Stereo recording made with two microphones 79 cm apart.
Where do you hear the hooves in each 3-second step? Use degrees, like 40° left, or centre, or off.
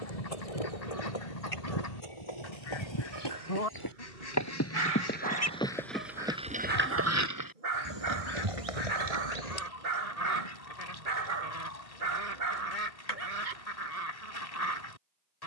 40° left, 20° left, 20° right, 50° right, off.